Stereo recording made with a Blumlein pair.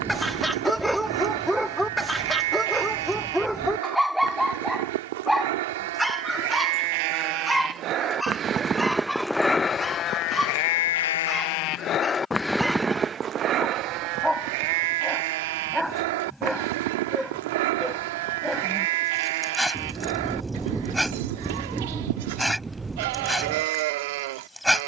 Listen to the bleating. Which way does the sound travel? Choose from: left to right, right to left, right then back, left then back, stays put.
left then back.